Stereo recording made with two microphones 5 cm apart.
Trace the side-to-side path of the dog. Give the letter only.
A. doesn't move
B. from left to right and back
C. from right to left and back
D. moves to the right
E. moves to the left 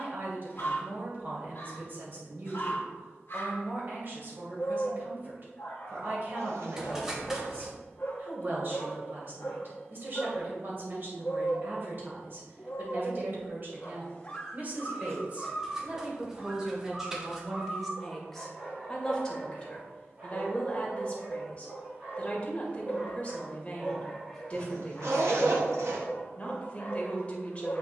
B.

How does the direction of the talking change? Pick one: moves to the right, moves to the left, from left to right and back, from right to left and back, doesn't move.
moves to the left.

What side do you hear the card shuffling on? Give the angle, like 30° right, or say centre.
10° right.